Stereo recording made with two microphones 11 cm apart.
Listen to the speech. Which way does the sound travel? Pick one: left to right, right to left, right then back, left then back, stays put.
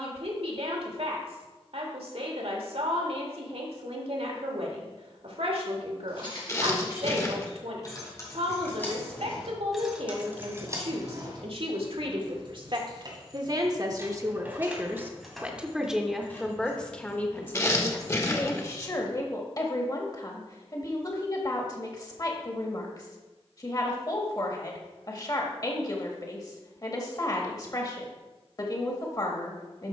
right to left.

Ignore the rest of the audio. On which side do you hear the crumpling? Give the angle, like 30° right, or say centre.
30° left.